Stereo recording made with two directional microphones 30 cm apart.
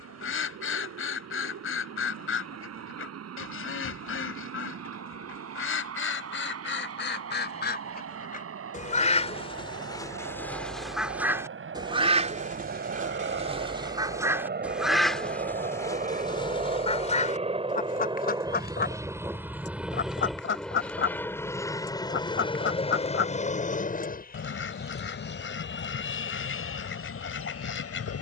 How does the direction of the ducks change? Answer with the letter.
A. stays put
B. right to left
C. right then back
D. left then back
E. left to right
C.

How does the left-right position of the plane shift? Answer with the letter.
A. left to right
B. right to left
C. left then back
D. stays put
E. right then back
B.